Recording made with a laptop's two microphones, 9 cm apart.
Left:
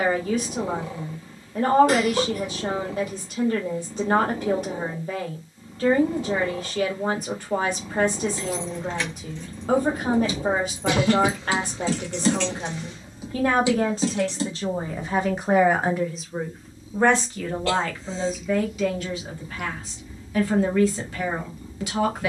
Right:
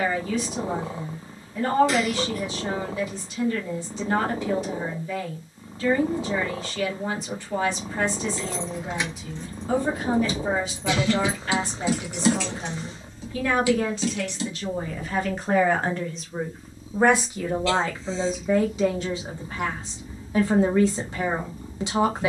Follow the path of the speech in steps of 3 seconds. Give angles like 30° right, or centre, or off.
50° left, 50° left, 50° left, 50° left, 40° left, centre, 30° right, 30° right.